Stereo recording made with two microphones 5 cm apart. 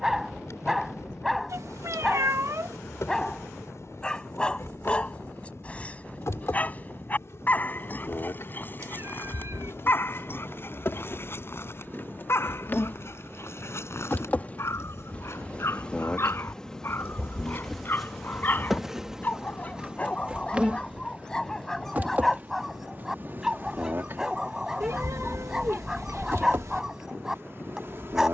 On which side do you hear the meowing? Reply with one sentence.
In this clip you hear the meowing on the right.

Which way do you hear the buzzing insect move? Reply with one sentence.
You can hear the buzzing insect move from left to right.